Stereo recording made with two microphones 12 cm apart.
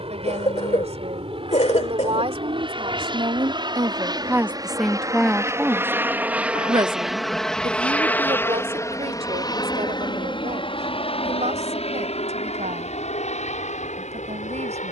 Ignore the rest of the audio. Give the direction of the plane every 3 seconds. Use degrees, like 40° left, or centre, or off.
50° right, 30° right, centre, 40° left, 60° left.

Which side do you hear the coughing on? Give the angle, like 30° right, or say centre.
60° left.